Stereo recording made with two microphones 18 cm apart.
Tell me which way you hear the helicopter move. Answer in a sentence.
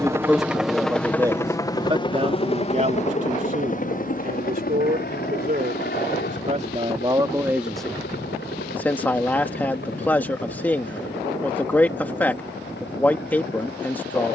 You can hear the helicopter move to the left.